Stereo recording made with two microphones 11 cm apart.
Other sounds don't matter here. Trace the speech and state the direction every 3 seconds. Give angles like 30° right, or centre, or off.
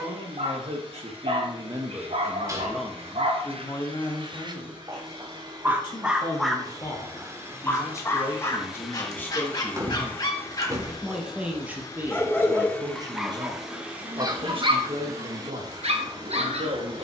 40° right, 30° left, 30° left, centre, 40° right, 60° right.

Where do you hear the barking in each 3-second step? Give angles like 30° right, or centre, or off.
70° right, 40° right, 10° left, 30° left, 20° right, 60° right.